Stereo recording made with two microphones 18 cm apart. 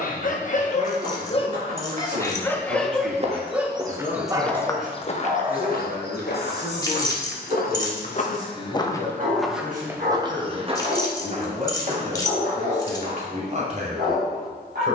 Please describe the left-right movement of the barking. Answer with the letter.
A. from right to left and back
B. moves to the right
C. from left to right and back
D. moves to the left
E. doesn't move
B.